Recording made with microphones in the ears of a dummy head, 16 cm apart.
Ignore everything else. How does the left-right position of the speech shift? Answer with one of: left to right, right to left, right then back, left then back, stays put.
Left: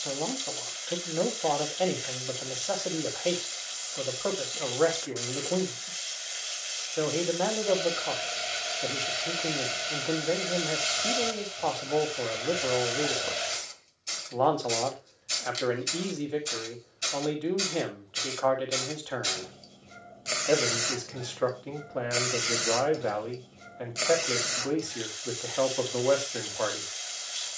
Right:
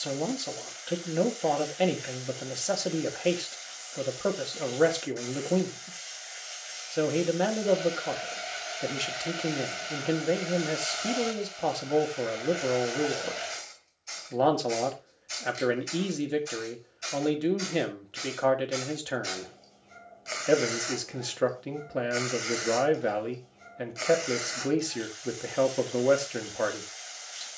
stays put.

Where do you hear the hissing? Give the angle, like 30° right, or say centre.
50° left.